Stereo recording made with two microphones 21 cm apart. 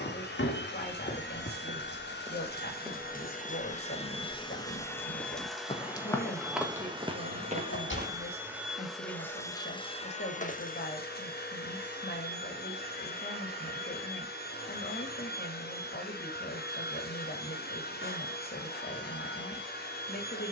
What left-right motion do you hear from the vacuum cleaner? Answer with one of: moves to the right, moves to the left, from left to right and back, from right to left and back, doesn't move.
from left to right and back.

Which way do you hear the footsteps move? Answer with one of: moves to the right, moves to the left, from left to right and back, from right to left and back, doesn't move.
from right to left and back.